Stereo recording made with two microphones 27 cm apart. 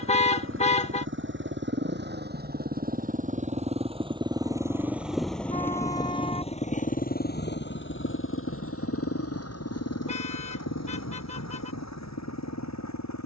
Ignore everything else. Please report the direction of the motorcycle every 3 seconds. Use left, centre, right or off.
right, centre, left, left, left.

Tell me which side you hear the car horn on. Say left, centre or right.
left.